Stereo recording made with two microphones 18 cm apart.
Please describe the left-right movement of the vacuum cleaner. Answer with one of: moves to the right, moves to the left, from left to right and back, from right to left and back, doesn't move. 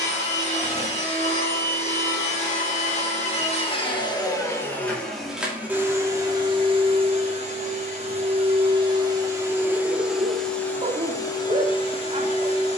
from left to right and back.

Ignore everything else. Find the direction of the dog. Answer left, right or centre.
right.